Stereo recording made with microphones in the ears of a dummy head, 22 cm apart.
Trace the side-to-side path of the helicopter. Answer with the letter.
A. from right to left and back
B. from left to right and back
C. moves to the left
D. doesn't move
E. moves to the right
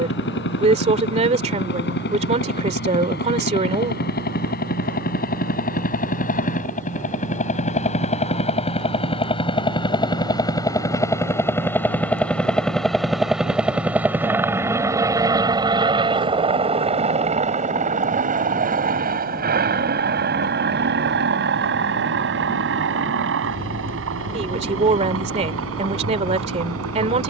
E.